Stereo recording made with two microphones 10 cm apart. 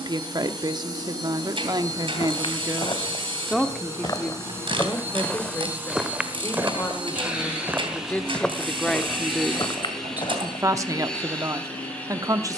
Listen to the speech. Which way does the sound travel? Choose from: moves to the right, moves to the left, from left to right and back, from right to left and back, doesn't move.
from right to left and back.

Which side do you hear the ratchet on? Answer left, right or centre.
right.